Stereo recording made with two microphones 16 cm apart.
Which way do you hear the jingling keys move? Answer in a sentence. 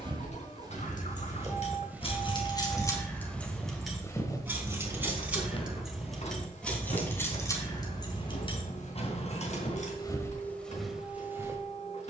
In this clip you hear the jingling keys go right and come back.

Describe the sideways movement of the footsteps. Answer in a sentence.
In this clip you hear the footsteps go left and come back.